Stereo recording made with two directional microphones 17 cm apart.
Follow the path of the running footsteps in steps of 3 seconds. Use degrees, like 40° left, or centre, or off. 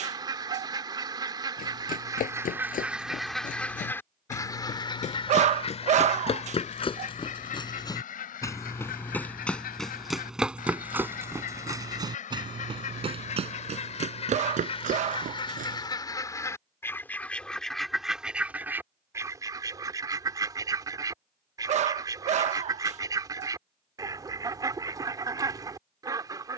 50° left, 50° left, 30° left, 10° right, 40° right, 50° right, off, off, off.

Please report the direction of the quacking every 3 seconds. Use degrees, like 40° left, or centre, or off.
20° right, 20° left, 50° left, 60° left, 40° left, 20° left, 20° right, 20° right, 20° right.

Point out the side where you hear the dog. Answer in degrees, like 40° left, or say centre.
40° right.